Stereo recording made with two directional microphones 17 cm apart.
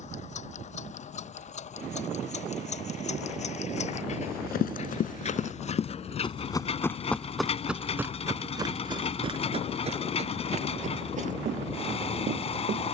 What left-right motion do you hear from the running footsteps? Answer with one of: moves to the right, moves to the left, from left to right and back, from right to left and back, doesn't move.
moves to the right.